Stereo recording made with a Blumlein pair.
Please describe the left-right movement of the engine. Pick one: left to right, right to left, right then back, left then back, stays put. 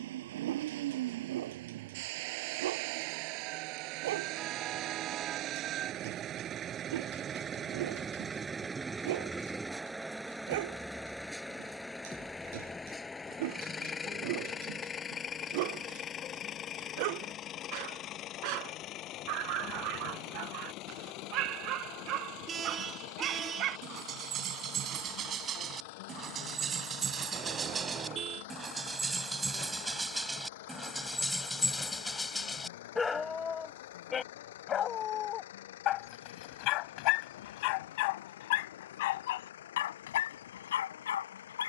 right to left.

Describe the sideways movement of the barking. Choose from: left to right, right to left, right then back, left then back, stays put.
right to left.